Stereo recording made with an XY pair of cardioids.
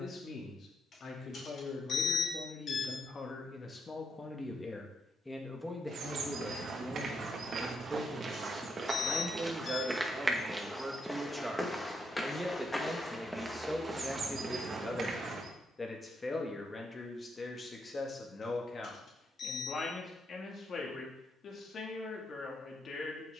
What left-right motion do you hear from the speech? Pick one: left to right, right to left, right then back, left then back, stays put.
right then back.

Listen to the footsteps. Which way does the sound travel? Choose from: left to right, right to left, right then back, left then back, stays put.
left then back.